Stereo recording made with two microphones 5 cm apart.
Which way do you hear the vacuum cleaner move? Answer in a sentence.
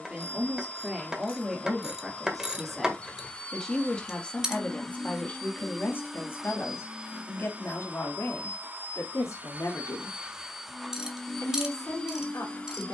In this clip you hear the vacuum cleaner move from left to right and back again.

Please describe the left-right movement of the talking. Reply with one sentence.
In this clip you hear the talking move from right to left.